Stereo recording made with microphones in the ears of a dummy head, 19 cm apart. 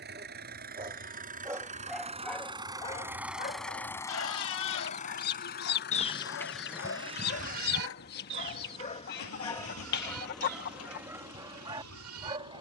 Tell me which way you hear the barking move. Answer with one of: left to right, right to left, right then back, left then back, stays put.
left then back.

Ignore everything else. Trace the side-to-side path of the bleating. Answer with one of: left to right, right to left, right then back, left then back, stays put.
left to right.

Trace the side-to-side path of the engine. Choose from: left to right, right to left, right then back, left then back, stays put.
right to left.